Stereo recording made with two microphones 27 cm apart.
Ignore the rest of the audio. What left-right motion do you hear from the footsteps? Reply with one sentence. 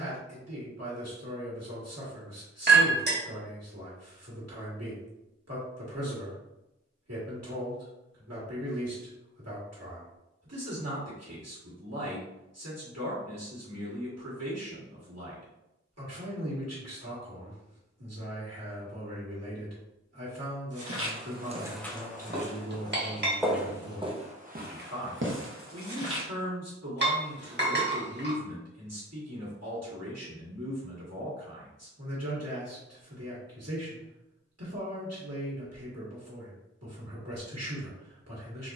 In this clip you hear the footsteps move from right to left and back again.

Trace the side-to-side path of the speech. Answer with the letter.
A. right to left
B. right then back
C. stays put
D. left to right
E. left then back
C.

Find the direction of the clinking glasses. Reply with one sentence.
In this clip you hear the clinking glasses on the right.